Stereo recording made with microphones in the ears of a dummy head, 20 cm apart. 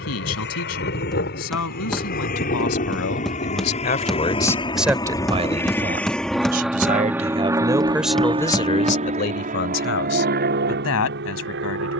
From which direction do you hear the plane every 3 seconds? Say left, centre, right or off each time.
left, left, centre, right.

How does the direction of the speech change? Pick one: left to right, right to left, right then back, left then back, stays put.
right then back.